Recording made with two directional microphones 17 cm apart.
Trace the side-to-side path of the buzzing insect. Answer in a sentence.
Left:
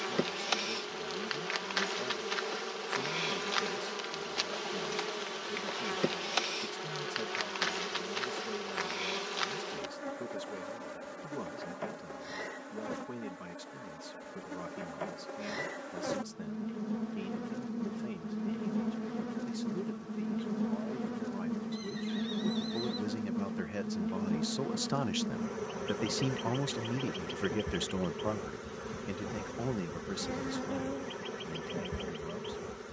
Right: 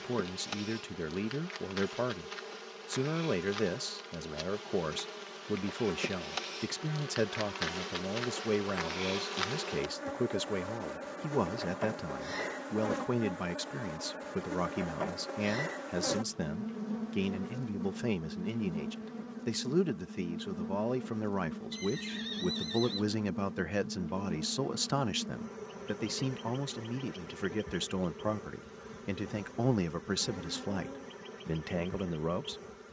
In this clip you hear the buzzing insect move from left to right and back again.